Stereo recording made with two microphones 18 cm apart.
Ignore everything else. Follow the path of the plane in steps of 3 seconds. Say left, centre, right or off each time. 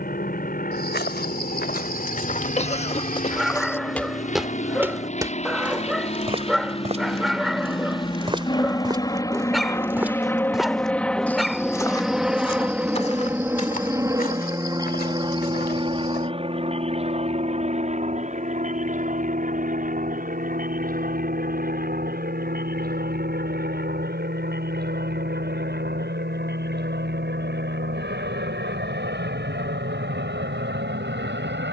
left, left, left, centre, centre, right, right, right, right, right, right.